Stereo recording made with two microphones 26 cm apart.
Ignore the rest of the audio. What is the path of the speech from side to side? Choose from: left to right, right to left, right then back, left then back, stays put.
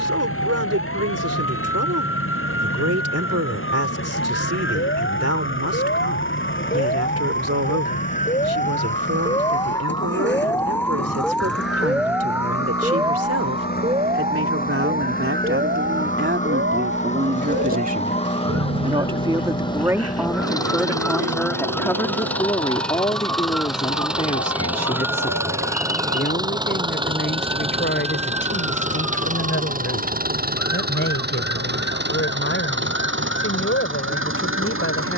right to left.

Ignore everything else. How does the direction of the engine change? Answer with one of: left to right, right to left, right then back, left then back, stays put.
left to right.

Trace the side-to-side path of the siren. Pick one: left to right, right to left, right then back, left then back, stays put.
left to right.